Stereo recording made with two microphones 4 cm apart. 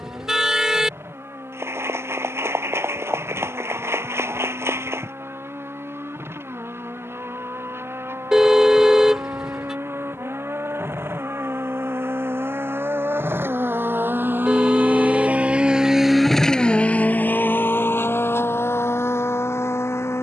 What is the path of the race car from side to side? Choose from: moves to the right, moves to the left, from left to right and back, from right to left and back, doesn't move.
moves to the left.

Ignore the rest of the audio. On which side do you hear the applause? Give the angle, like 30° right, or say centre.
80° right.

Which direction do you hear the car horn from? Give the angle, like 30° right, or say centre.
10° right.